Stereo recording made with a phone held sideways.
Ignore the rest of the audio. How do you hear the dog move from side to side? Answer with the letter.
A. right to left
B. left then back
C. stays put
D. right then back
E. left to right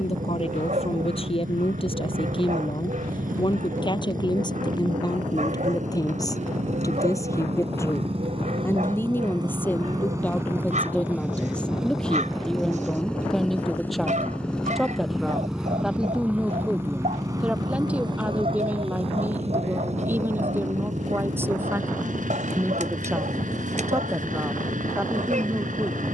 C.